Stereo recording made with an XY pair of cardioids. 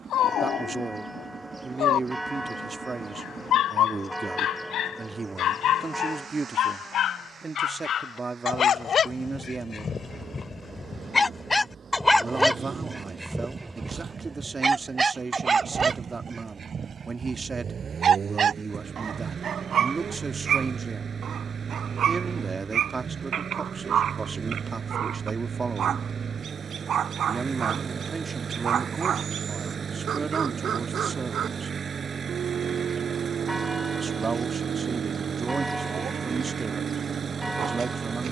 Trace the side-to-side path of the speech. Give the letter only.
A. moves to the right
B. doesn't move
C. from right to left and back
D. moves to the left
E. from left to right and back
B.